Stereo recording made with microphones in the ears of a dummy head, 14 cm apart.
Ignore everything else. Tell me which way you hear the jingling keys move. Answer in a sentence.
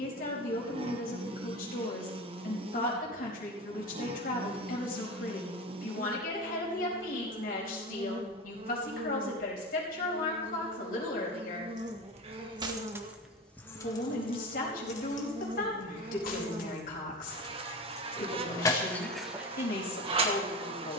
You can hear the jingling keys move from right to left and back again.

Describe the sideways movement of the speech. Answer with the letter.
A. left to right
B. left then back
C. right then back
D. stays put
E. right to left
D.